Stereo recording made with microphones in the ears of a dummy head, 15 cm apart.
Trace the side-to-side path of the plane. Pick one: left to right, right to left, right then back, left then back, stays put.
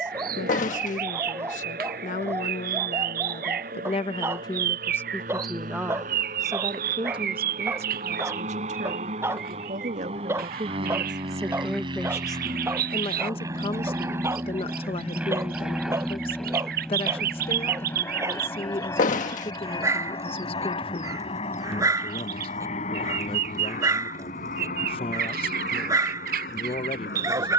right to left.